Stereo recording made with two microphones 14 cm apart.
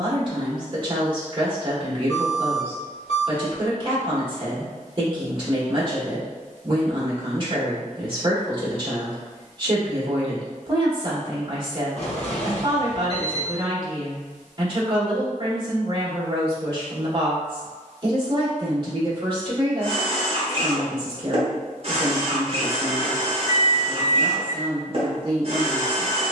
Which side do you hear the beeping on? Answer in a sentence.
You can hear the beeping on the left.